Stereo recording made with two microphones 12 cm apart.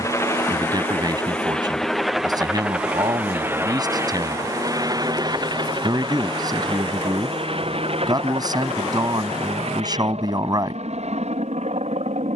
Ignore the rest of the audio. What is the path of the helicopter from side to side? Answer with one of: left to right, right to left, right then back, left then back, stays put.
left to right.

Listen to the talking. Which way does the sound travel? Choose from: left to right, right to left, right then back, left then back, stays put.
stays put.